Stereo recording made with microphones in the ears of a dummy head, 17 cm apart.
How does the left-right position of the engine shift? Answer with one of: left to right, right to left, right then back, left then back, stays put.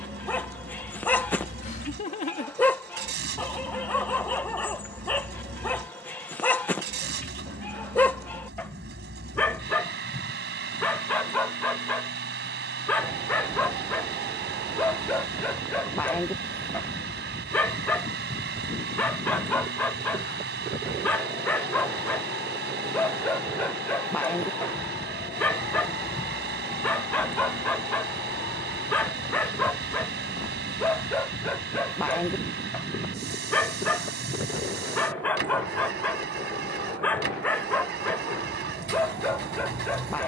stays put.